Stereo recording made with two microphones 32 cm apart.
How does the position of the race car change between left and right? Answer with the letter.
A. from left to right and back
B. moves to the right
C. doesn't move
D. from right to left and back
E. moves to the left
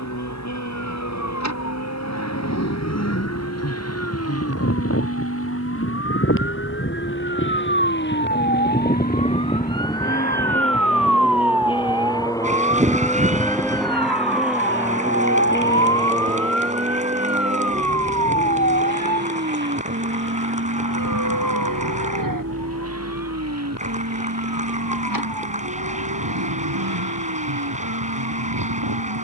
B.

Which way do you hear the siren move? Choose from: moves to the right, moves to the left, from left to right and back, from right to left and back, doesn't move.
moves to the right.